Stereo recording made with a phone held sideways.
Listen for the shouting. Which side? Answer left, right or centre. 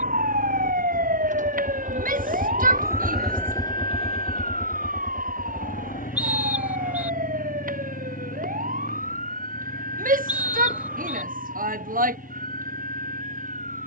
right.